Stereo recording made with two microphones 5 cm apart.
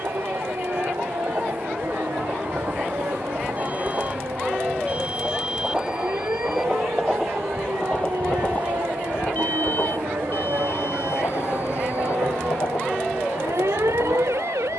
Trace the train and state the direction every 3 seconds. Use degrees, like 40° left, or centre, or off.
40° right, 20° right, 10° left, 60° left, 80° left.